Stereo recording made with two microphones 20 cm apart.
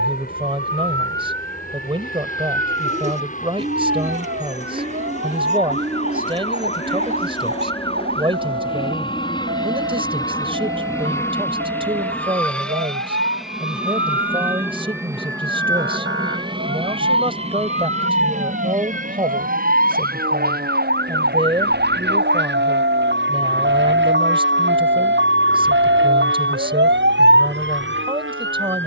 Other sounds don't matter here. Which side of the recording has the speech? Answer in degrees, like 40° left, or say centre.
30° right.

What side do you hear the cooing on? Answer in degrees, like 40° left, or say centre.
40° right.